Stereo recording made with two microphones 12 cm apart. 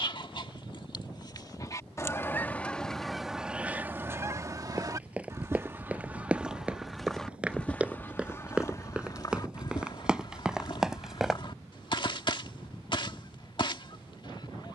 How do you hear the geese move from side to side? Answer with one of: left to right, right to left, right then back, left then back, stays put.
right then back.